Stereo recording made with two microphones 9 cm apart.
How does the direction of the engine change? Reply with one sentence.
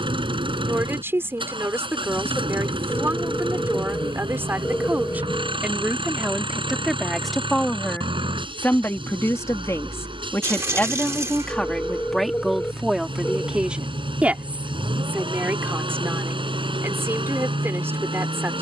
You can hear the engine stay in one place.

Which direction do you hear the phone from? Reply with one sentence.
You can hear the phone on the left.